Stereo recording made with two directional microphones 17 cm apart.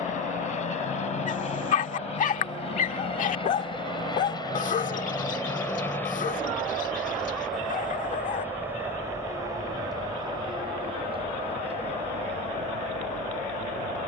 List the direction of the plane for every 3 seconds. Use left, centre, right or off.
left, left, centre, right, right.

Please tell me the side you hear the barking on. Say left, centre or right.
left.